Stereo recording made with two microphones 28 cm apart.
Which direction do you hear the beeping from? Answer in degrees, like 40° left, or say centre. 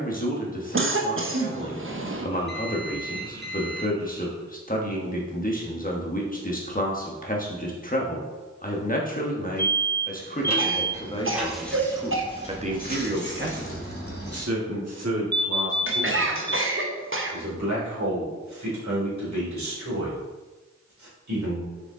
40° right.